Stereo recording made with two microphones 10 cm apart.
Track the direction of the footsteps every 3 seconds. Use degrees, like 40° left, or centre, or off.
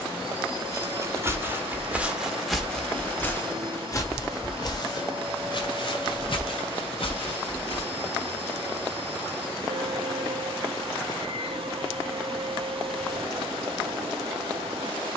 10° right, 40° left, 70° left, off, off.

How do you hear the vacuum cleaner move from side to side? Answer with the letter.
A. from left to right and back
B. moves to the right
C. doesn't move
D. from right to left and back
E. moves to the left
C.